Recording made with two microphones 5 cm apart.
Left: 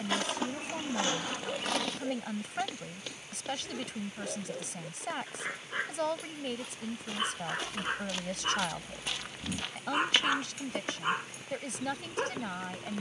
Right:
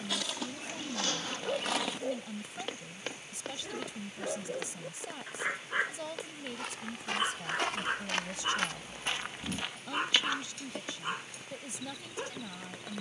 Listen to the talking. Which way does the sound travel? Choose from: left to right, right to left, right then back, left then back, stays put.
stays put.